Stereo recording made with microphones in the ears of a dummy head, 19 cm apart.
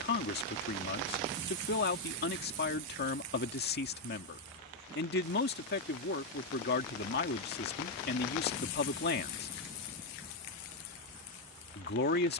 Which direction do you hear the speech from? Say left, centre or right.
left.